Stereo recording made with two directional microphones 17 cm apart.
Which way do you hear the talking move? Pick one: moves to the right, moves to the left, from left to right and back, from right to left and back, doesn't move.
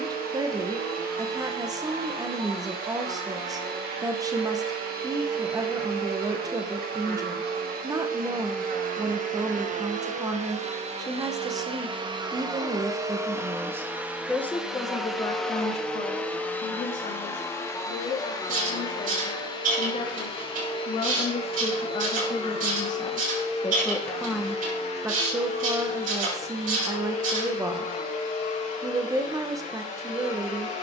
from right to left and back.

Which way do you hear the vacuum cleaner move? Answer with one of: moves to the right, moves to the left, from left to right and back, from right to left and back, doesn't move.
moves to the left.